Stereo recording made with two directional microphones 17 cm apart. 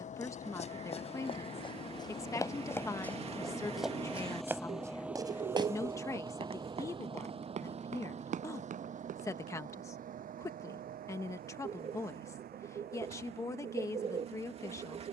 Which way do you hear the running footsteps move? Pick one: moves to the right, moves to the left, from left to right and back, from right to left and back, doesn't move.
moves to the right.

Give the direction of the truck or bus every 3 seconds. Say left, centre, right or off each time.
left, centre, right, right, right.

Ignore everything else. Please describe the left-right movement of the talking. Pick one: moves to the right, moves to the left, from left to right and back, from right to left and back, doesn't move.
doesn't move.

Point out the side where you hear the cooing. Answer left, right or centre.
right.